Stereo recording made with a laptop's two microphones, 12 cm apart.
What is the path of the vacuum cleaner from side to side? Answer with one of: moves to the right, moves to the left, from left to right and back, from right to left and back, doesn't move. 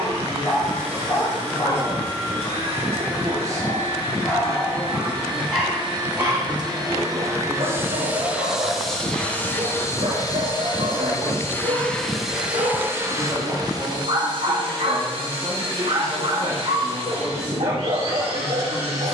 from right to left and back.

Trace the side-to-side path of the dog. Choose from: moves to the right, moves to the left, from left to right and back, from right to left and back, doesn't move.
moves to the right.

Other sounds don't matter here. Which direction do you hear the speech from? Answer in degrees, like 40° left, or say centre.
30° right.